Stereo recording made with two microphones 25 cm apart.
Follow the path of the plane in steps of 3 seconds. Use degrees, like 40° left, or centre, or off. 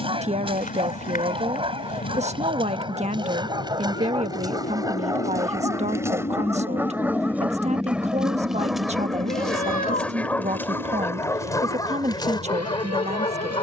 70° left, 50° left, centre, 50° right, 60° right.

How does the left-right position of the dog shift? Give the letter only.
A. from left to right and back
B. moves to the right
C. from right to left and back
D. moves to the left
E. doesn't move
D.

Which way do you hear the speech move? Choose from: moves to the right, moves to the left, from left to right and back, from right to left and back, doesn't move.
doesn't move.